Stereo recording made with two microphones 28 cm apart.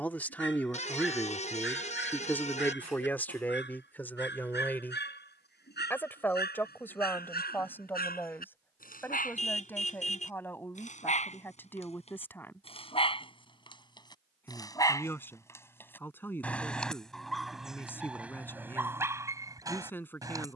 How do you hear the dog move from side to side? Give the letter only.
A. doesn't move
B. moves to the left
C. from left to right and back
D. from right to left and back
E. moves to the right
E.